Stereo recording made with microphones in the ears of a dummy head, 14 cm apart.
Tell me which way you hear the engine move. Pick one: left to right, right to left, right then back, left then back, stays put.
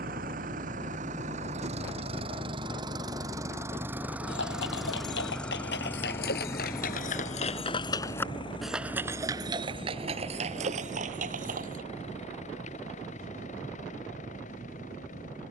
right to left.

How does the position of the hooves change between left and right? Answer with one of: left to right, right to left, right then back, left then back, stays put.
left to right.